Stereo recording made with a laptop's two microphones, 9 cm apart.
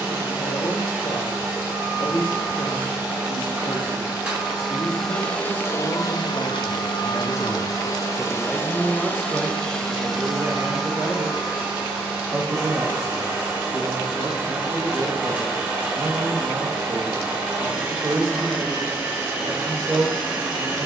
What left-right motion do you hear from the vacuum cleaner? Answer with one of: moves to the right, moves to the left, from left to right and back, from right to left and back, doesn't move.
from right to left and back.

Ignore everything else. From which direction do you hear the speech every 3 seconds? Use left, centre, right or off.
left, left, left, right, right, right, right.